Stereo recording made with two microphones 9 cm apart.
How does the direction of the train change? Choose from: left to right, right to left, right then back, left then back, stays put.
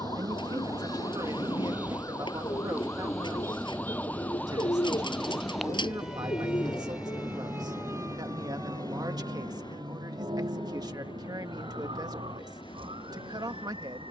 right to left.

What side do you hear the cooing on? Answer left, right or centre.
left.